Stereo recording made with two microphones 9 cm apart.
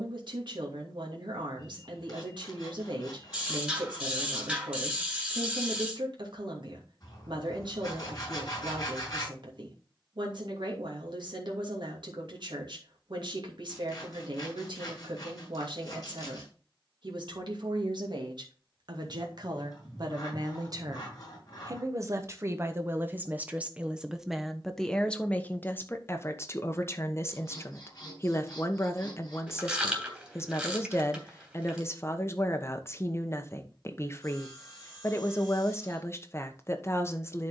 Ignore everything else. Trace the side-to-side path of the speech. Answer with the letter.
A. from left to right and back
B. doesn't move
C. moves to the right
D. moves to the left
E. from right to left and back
D.